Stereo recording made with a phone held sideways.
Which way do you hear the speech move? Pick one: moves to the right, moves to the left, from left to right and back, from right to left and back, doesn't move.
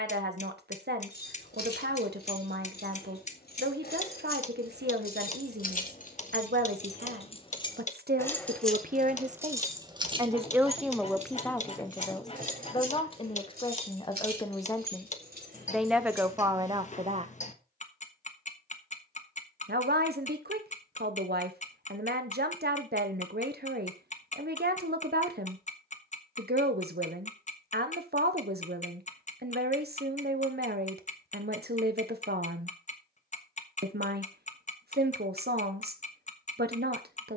from right to left and back.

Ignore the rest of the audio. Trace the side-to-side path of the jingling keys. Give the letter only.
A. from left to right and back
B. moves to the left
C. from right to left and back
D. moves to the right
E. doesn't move
D.